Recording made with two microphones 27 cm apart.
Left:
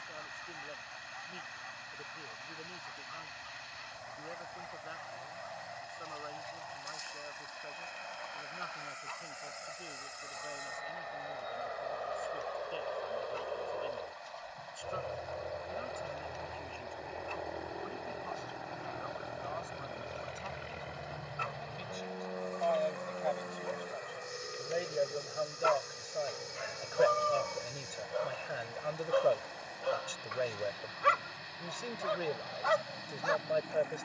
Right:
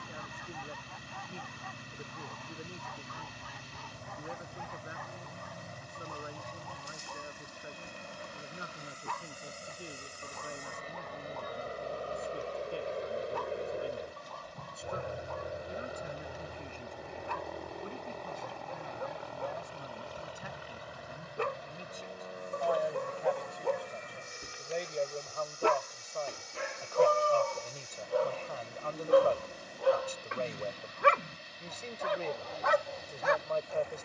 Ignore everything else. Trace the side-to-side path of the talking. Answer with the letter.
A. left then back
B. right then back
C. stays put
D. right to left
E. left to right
D.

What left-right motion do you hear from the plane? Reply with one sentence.
You can hear the plane move to the left.